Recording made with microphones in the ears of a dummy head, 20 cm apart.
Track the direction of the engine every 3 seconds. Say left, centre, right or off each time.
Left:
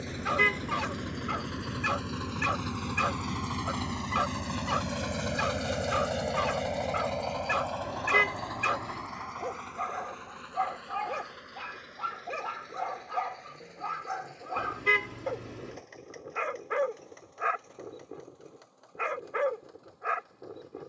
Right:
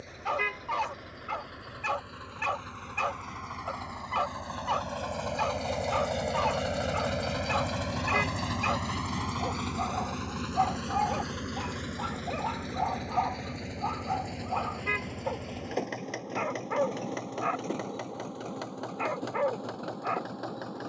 left, left, right, right, right, right, right.